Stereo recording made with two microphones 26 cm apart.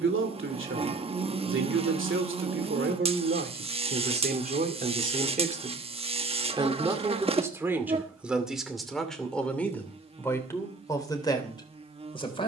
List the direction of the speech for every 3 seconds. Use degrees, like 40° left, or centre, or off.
50° right, 40° right, 10° right, 10° left.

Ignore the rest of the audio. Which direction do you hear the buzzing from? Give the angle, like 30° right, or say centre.
20° right.